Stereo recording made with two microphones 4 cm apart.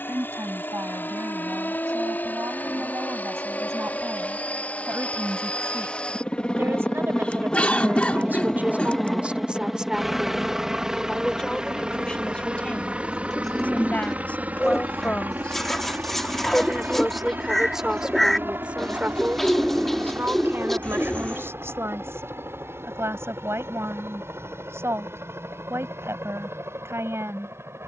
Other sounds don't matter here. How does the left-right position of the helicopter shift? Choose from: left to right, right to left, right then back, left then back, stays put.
left to right.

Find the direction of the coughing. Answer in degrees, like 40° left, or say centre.
30° left.